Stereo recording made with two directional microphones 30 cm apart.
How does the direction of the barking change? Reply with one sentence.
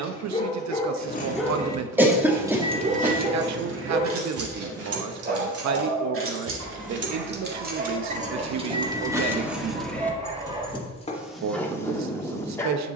In this clip you hear the barking move from left to right and back again.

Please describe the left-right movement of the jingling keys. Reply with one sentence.
You can hear the jingling keys go right and come back.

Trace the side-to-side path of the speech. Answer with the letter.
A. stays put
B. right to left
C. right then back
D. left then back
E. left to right
A.